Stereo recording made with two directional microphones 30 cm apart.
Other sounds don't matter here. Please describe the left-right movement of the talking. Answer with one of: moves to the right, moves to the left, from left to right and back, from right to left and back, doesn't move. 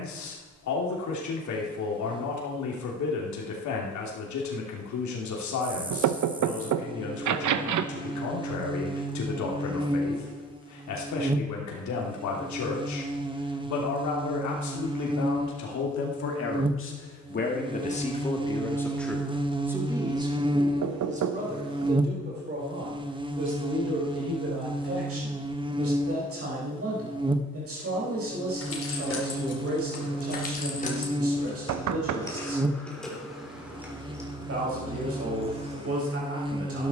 moves to the right.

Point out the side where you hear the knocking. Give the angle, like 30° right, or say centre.
60° right.